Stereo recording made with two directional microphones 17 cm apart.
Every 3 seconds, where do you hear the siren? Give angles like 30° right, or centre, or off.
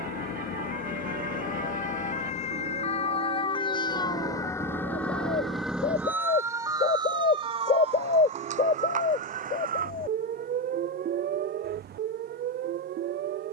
50° left, 20° left, 30° right, 50° right, 60° right.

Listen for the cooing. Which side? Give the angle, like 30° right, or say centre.
40° left.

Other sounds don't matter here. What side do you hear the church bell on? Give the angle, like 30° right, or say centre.
60° right.